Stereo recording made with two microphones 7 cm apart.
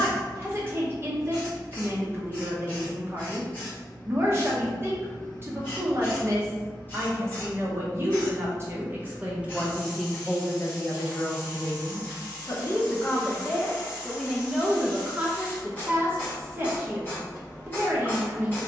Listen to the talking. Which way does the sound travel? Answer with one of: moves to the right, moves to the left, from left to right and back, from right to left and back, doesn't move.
from right to left and back.